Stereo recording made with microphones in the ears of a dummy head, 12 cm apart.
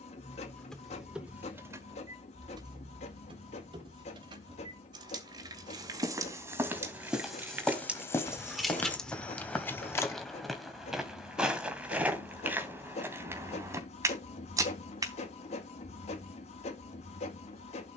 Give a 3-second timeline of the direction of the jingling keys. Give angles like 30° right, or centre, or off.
10° right, 40° right, 10° right, 10° left, off, off.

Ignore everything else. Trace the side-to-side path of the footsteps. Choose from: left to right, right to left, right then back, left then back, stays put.
left then back.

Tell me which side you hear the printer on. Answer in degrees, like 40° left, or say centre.
50° left.